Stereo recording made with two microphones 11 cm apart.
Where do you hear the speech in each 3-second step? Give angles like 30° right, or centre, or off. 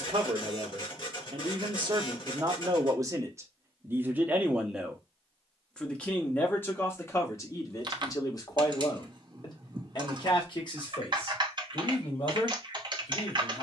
50° right, 10° right, 30° left, 50° left, 50° left.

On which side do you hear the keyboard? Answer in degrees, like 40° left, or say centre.
40° right.